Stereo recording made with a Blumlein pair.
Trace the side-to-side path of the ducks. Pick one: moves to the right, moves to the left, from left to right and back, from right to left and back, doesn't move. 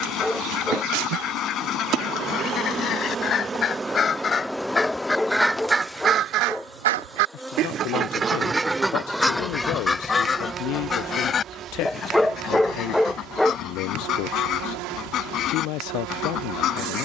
from left to right and back.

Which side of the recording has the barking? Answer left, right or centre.
centre.